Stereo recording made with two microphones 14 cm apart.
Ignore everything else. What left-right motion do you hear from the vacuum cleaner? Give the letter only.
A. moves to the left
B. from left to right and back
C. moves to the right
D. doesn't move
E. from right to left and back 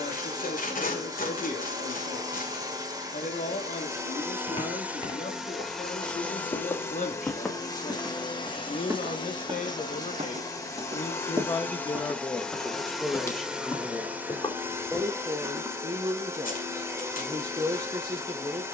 E.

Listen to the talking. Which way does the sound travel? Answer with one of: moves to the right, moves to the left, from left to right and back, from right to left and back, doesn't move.
moves to the right.